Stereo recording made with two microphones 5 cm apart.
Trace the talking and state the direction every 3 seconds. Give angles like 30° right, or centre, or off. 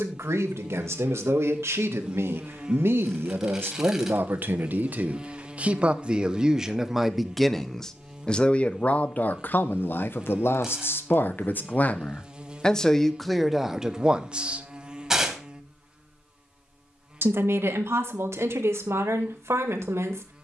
50° right, 40° right, centre, 40° left, centre, 50° right, 60° right.